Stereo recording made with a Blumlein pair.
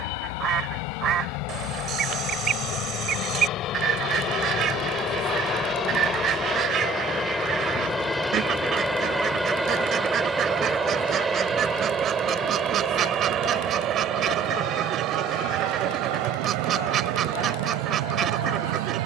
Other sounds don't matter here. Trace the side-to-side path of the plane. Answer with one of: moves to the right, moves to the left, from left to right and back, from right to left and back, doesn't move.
moves to the right.